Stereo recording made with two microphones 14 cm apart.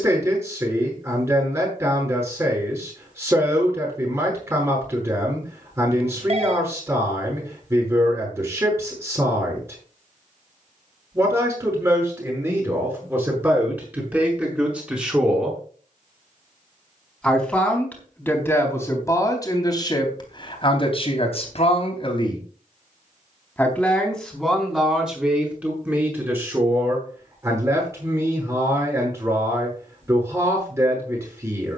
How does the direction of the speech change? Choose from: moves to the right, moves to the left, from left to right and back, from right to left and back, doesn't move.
from right to left and back.